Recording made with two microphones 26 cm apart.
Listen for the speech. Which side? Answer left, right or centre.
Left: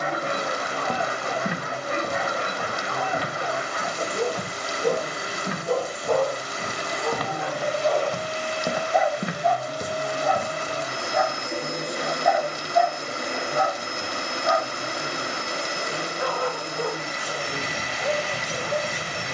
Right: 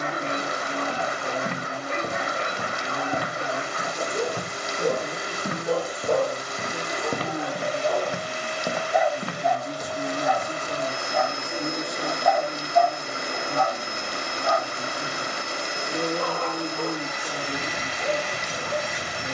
right.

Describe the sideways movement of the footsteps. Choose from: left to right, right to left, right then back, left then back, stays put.
right then back.